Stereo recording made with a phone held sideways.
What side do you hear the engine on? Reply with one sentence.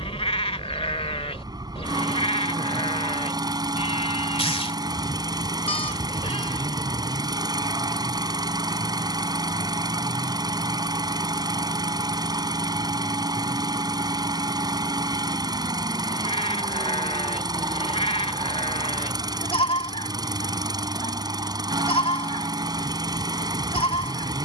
In this clip you hear the engine on the right.